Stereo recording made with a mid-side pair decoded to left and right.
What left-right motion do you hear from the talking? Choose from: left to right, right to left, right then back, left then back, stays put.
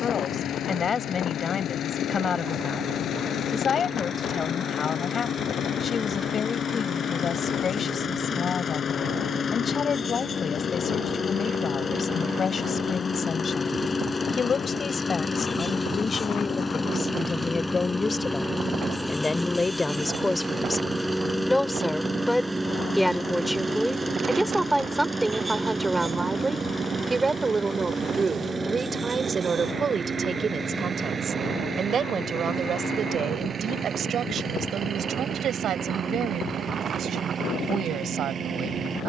left to right.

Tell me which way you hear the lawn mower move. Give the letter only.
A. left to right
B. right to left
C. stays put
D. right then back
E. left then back
A.